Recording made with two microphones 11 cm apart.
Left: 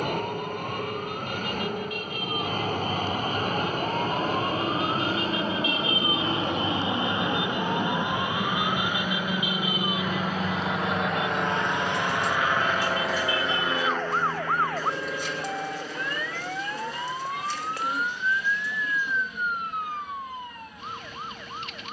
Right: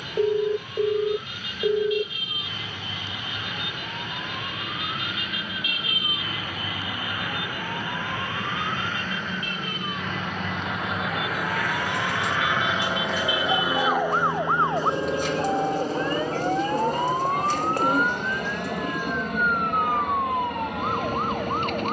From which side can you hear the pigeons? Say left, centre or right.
right.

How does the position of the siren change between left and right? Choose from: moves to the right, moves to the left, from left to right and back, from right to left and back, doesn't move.
moves to the right.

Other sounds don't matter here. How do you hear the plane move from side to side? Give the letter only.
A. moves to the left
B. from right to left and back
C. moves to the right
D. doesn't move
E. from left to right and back
C.